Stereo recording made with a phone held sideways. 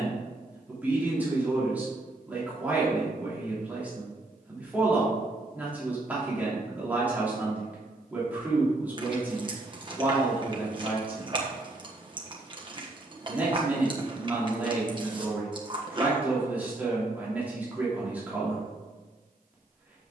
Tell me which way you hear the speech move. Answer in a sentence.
In this clip you hear the speech stay put.